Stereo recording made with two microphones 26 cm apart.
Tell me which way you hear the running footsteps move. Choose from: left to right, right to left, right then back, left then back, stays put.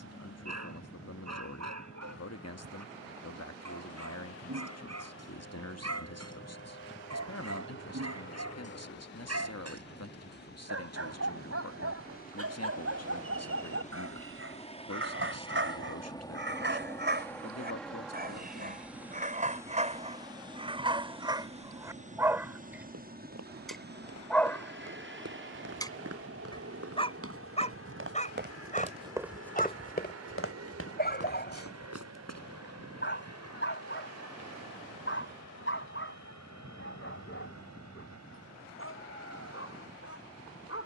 right to left.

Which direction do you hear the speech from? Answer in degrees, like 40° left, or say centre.
70° left.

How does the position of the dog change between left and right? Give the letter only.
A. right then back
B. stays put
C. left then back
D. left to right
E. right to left
E.